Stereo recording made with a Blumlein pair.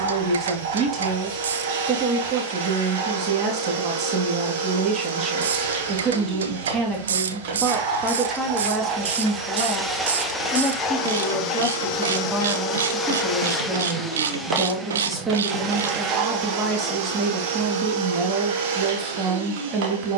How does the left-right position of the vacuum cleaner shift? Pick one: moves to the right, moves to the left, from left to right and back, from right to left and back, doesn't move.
from right to left and back.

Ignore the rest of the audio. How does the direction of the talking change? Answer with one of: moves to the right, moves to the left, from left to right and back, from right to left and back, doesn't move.
from right to left and back.